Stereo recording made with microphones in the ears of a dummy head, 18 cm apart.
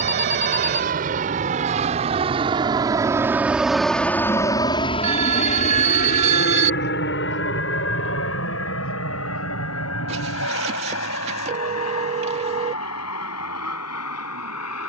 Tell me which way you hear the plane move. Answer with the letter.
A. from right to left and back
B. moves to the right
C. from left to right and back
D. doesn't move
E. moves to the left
E.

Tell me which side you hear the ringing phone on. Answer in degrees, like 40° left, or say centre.
40° right.